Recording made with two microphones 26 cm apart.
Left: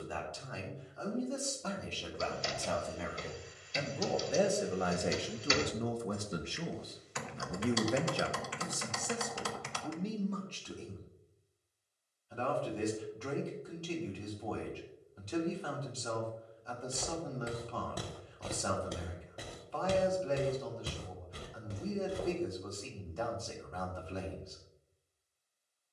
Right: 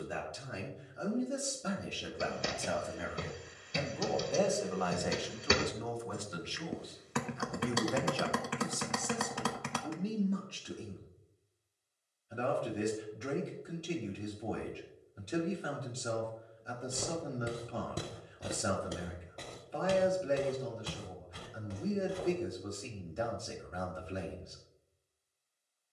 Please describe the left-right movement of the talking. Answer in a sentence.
You can hear the talking move from right to left and back again.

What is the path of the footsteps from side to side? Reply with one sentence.
In this clip you hear the footsteps move from right to left.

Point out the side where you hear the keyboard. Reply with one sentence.
You can hear the keyboard on the right.